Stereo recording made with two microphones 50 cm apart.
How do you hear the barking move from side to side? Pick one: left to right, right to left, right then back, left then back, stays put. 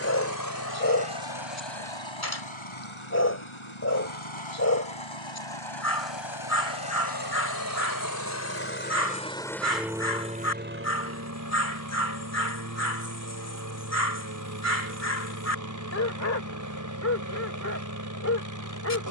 stays put.